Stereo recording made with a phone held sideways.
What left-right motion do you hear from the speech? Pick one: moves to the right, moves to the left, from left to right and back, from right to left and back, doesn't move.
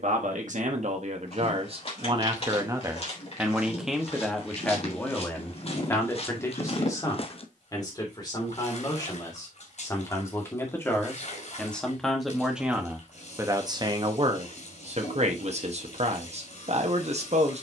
from right to left and back.